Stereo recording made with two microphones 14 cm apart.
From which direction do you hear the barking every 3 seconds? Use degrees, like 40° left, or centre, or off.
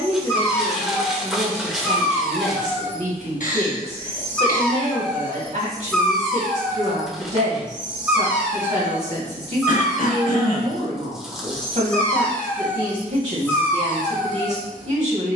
20° left, 10° left, 10° right, centre, 20° left.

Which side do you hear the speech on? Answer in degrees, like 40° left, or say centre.
50° right.